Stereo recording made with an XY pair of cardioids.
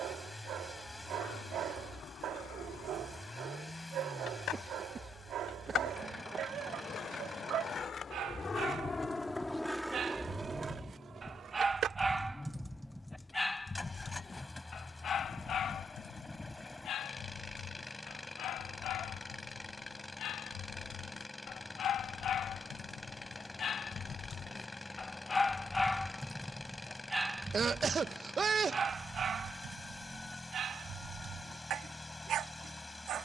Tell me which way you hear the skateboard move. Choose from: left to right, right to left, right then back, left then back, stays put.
left to right.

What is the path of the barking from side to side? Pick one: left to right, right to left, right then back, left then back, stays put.
left then back.